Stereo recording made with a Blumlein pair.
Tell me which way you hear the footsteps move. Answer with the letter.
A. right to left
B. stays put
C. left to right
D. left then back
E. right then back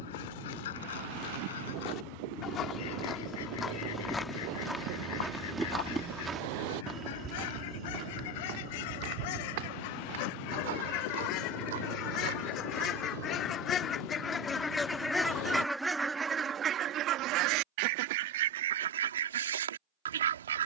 C.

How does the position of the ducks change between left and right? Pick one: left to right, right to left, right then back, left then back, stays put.
left to right.